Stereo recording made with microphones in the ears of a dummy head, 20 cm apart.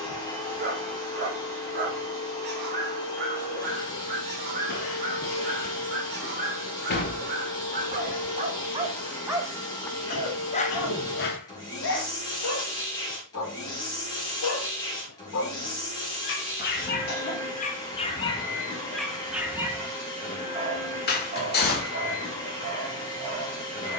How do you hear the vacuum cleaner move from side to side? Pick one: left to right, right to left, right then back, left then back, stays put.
stays put.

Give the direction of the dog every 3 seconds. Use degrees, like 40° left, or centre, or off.
50° right, 50° right, 40° right, 40° left, 70° left, 50° left, centre, 40° right.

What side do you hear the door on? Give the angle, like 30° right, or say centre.
40° left.